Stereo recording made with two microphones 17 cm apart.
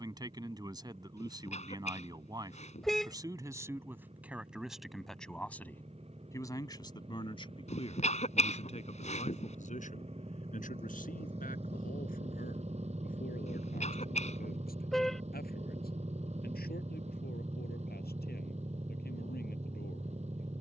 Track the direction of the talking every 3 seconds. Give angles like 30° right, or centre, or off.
20° right, 10° right, 30° left, 50° left, 60° left, 70° left, 70° left.